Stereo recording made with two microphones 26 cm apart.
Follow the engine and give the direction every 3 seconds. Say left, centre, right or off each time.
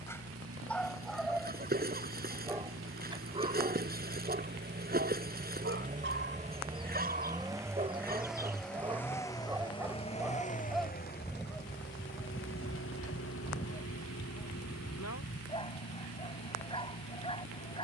right, right, centre, left, left, left.